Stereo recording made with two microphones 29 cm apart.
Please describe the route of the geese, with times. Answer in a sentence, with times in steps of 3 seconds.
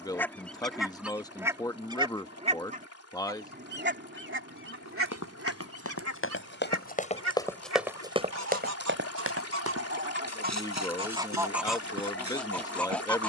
In this clip you hear the geese in the centre from 0 s, on the right from 3 s and in the centre from 12 s.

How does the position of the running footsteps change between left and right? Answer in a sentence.
You can hear the running footsteps move from left to right.